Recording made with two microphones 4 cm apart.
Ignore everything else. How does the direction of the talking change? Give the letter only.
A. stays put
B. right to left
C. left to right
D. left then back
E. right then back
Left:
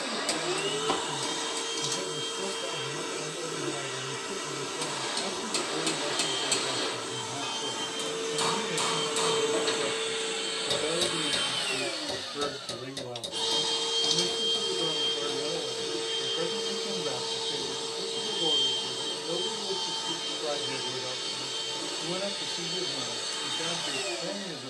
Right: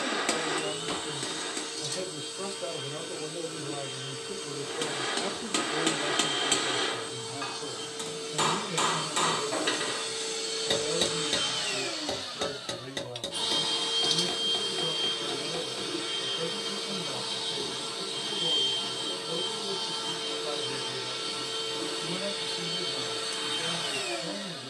B.